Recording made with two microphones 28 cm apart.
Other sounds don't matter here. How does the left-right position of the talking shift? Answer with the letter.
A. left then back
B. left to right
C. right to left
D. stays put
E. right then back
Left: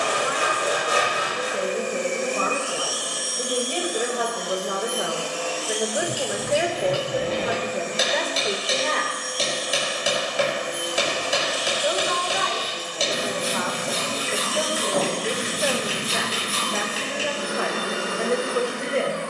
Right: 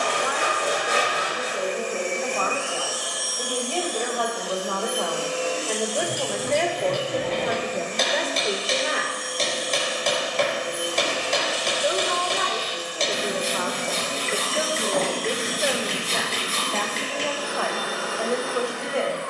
E.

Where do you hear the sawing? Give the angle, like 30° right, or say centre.
10° left.